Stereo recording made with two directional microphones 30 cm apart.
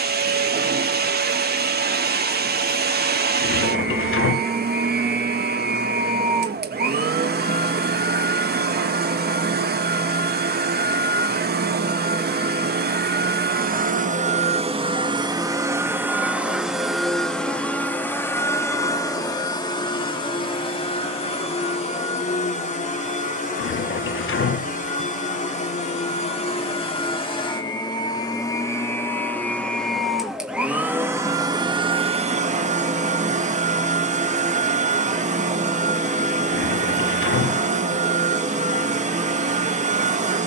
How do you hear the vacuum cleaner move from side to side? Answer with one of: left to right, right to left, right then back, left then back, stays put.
left then back.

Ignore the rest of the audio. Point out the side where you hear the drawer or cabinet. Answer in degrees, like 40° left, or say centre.
40° left.